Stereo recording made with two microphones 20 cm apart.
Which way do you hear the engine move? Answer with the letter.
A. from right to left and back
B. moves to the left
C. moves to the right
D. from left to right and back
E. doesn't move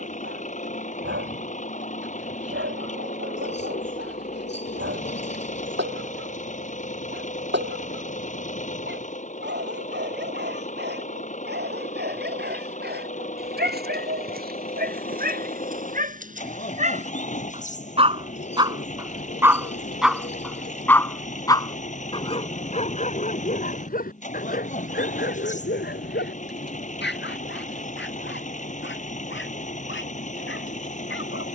E.